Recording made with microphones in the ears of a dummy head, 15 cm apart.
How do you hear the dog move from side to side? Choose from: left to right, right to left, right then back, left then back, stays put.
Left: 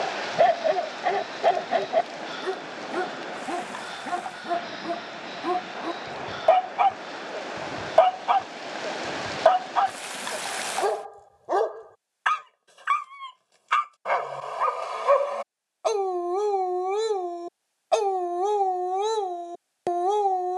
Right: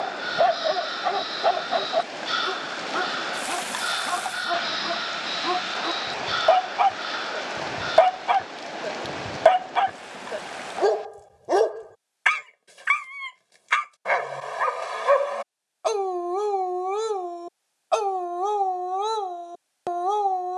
right then back.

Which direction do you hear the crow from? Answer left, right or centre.
right.